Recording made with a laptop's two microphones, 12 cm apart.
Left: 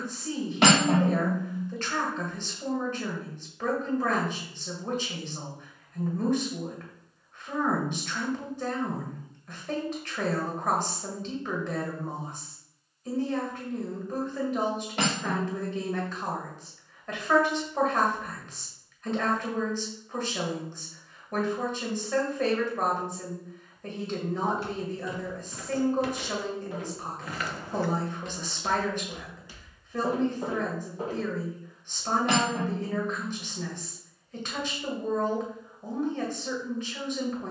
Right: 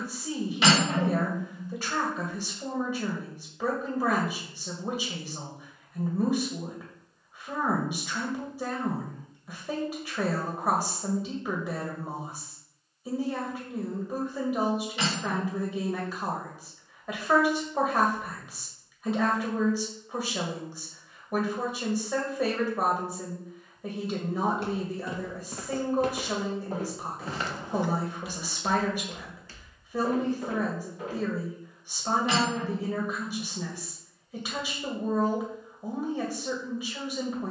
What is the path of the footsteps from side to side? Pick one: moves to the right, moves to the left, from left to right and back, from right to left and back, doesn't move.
moves to the left.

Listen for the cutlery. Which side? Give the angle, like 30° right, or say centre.
60° left.